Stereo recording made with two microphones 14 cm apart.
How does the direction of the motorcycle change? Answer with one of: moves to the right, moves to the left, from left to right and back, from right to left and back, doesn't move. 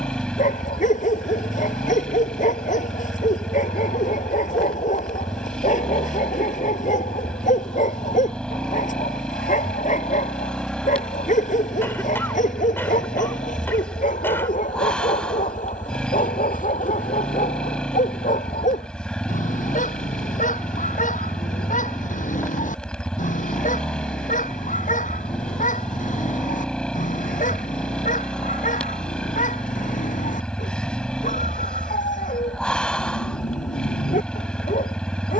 doesn't move.